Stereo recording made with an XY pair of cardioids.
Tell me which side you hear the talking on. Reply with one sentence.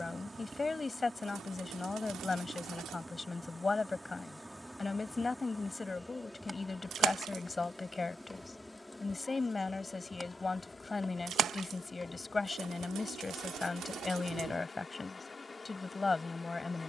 You can hear the talking on the left.